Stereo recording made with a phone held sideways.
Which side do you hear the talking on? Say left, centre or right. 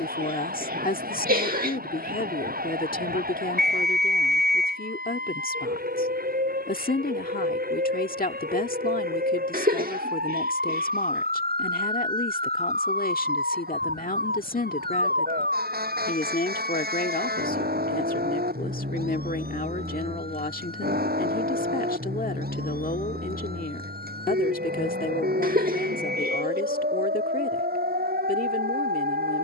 left.